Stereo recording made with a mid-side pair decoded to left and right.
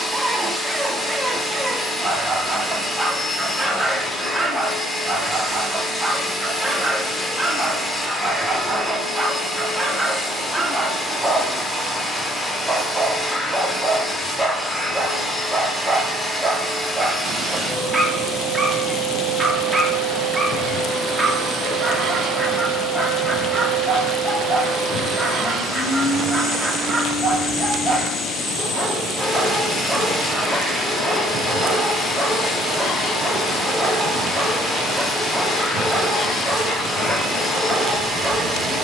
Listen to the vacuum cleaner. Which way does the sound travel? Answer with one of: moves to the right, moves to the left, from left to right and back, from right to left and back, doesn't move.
doesn't move.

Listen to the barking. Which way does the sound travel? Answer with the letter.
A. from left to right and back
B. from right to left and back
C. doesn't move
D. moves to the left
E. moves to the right
C.